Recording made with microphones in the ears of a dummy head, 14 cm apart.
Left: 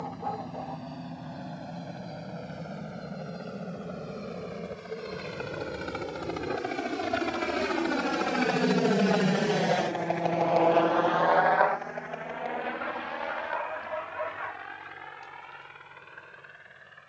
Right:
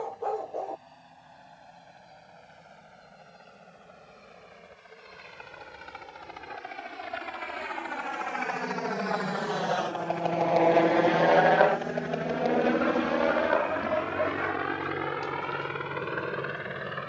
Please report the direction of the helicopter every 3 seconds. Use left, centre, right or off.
left, left, left, centre, right, right.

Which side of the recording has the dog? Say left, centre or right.
right.